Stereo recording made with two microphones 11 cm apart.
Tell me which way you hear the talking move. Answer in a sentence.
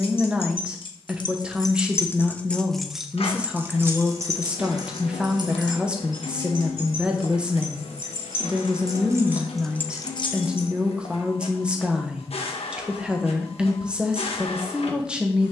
In this clip you hear the talking stay in one place.